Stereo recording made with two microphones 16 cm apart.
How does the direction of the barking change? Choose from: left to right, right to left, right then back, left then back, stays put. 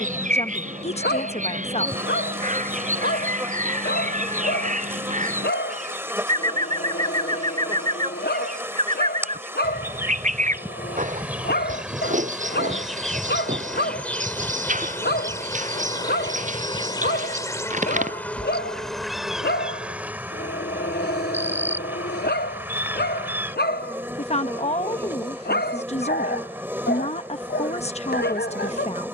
stays put.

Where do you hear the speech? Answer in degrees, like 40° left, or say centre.
40° left.